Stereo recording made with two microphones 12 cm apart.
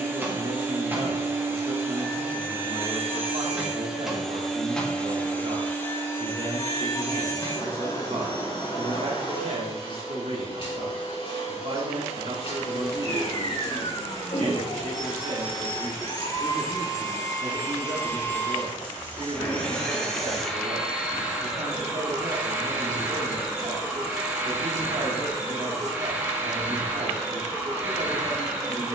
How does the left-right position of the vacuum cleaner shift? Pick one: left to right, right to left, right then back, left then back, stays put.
left then back.